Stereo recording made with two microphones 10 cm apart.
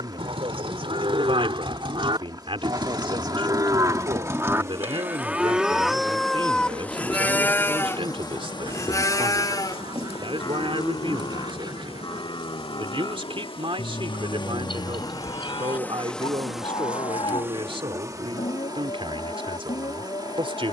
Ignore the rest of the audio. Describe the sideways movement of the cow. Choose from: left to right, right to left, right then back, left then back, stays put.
right to left.